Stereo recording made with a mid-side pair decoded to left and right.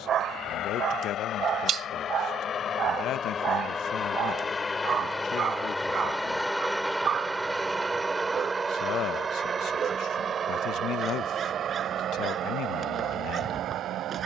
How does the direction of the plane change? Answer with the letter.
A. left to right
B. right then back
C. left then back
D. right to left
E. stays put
A.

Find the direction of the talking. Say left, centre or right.
left.